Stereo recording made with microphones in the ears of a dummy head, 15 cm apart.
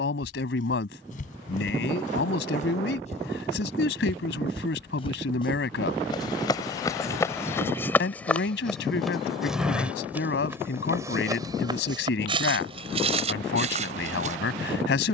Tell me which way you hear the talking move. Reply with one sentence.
You can hear the talking stay put.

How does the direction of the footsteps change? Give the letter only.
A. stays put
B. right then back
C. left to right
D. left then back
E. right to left
C.